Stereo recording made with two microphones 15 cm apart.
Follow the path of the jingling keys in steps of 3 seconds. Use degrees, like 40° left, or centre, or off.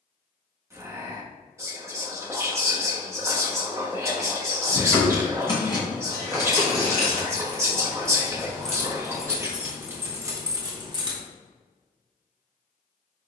off, 30° left, 20° left, 20° right, off.